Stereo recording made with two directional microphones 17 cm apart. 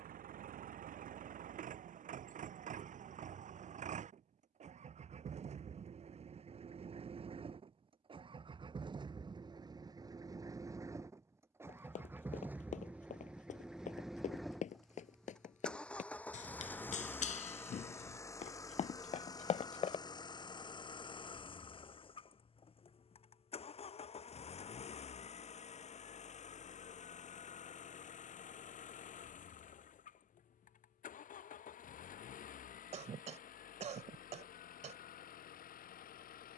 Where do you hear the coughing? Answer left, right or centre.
right.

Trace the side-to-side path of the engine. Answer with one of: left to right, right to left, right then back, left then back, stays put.
right to left.